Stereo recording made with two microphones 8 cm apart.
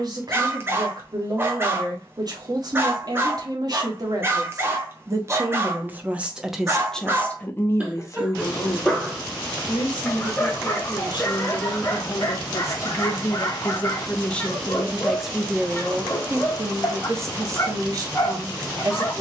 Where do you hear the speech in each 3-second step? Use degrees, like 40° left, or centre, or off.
50° right, 40° right, 20° left, 60° left, 30° left, 20° right, 40° right.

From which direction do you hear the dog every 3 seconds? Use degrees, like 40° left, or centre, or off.
30° right, 30° right, 10° right, 20° left, 30° left, 30° left, 30° left.